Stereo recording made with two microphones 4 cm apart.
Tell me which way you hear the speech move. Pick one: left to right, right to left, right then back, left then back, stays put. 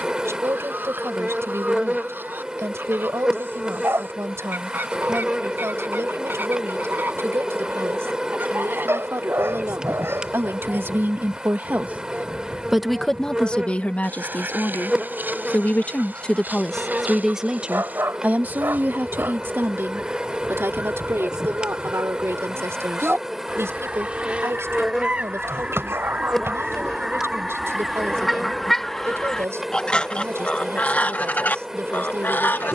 left then back.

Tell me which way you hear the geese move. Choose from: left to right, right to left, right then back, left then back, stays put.
right to left.